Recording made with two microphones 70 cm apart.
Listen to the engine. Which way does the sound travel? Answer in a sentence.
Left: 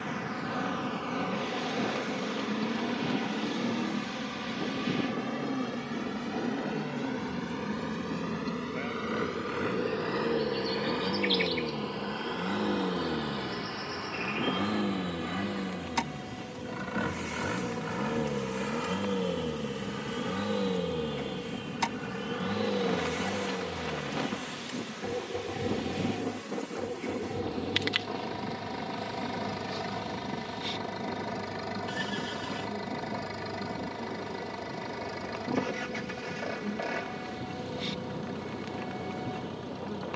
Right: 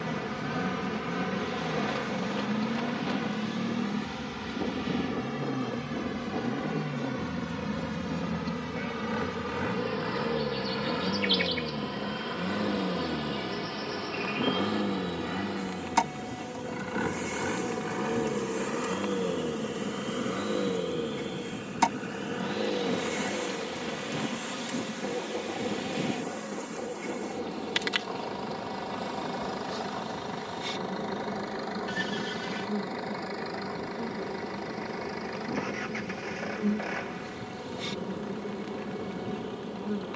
In this clip you hear the engine travel towards the left.